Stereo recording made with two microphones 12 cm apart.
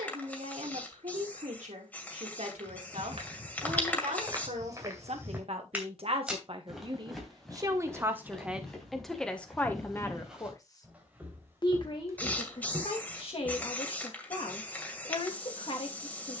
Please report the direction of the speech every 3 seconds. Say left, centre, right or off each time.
right, right, right, left, left, left.